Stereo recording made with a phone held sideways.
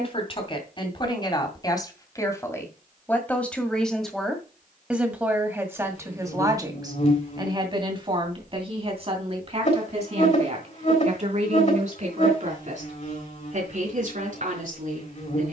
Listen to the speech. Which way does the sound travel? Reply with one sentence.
In this clip you hear the speech travel towards the right.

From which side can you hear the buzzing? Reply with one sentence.
You can hear the buzzing on the left.